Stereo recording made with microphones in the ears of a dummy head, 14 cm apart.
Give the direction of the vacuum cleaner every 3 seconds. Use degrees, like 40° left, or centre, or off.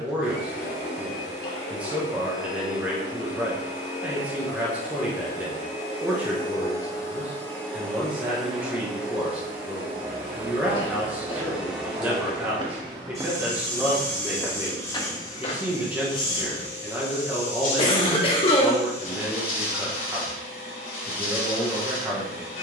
70° left, 60° left, 10° left, 10° right, 10° left, 40° left, 60° left, 60° left.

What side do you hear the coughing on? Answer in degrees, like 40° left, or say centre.
40° left.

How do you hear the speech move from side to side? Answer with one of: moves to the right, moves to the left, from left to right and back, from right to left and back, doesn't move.
doesn't move.